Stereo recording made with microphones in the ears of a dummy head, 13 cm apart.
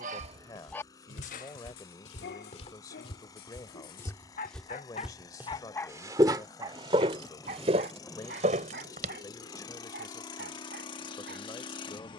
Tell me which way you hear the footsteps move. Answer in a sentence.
In this clip you hear the footsteps move from left to right.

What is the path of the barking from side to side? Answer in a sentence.
In this clip you hear the barking go left and come back.